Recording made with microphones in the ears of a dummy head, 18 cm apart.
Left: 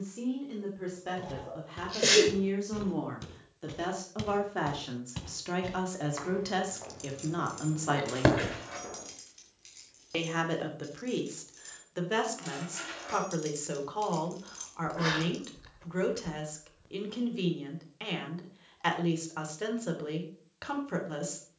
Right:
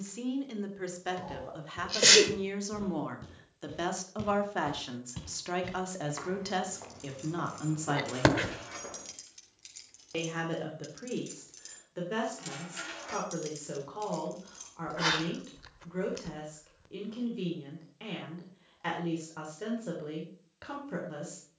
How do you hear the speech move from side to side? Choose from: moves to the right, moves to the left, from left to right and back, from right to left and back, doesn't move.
moves to the left.